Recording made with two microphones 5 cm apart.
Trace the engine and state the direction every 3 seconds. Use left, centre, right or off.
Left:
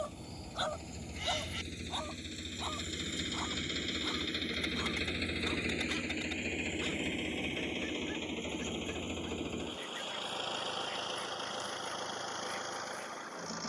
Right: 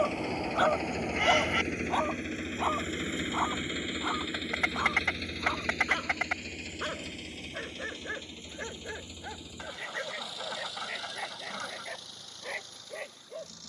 right, centre, left, left, left.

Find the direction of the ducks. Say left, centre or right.
right.